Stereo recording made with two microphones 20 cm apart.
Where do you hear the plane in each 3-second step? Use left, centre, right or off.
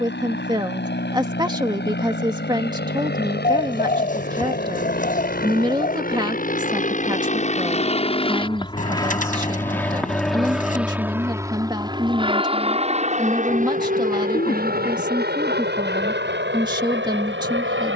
left, left, left, centre, right, right.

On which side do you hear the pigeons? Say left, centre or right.
left.